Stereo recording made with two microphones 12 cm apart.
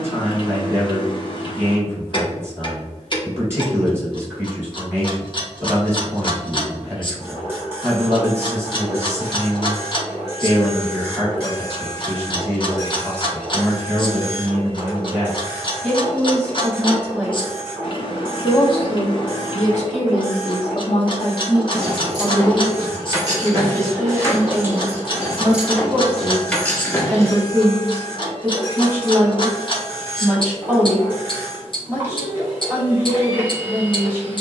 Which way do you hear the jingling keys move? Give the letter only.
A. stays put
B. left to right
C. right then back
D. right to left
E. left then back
D.